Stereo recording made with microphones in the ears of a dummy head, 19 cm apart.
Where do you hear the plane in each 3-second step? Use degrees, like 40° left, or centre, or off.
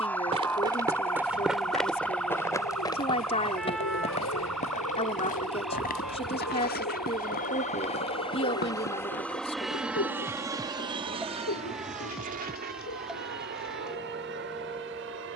80° left, 60° left, 30° left, 10° right, 40° right.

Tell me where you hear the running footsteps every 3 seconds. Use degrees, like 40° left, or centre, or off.
centre, 30° left, 40° left, 50° left, off.